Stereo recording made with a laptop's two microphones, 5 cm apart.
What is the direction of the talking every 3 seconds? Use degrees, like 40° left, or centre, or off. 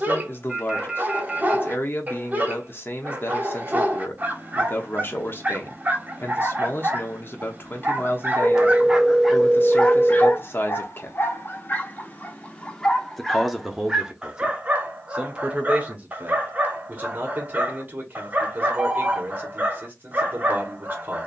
40° left, 40° left, 40° left, 40° left, centre, 30° right, 30° right.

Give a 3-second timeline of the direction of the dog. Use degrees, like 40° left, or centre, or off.
30° right, 30° right, 30° right, 30° left, centre, 30° right, 30° right.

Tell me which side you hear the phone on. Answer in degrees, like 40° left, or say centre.
10° right.